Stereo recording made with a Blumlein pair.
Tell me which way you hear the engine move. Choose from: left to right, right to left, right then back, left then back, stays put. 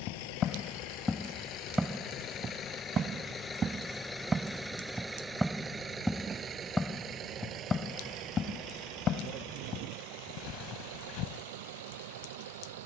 left to right.